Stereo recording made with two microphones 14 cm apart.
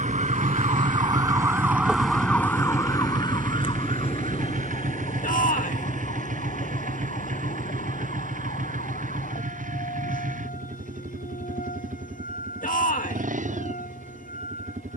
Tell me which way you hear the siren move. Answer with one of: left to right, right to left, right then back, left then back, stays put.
right to left.